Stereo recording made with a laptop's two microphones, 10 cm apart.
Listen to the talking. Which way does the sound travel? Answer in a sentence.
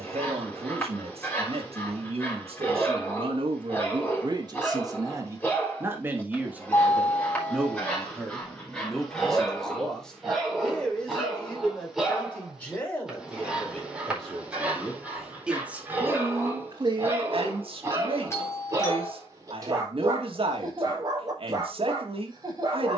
In this clip you hear the talking move from right to left and back again.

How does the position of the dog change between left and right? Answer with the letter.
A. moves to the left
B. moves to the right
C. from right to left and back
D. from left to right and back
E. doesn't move
B.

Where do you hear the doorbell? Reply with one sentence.
You can hear the doorbell on the left.